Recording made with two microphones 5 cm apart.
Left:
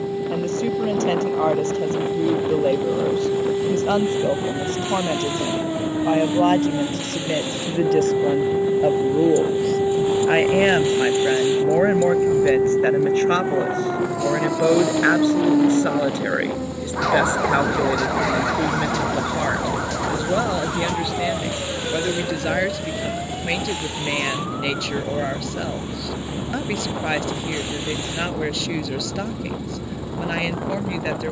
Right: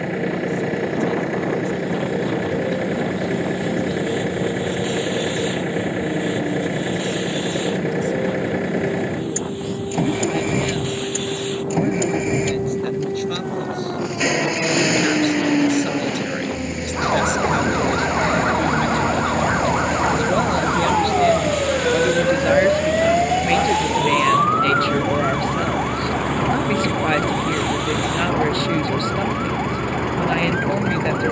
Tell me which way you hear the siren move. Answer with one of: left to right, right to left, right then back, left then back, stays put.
left to right.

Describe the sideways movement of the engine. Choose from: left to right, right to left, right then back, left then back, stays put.
stays put.